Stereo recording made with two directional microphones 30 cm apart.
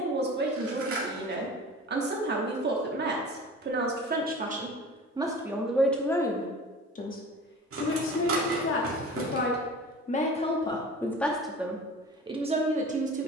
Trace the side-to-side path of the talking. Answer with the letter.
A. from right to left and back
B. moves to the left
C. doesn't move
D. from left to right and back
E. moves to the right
A.